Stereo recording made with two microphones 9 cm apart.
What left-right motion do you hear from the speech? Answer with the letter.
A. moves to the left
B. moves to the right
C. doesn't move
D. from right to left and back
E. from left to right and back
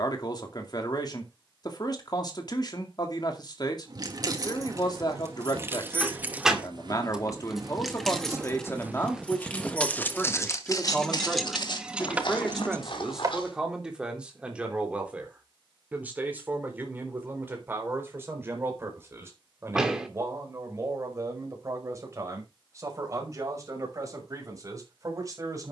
B.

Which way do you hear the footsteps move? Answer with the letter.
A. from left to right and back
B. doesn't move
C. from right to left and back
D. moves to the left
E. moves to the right
D.